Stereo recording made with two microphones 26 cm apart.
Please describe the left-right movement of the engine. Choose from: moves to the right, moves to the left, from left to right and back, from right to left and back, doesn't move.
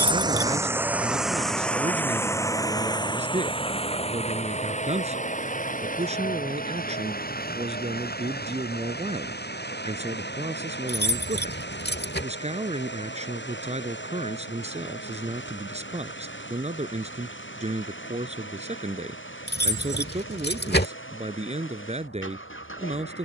moves to the left.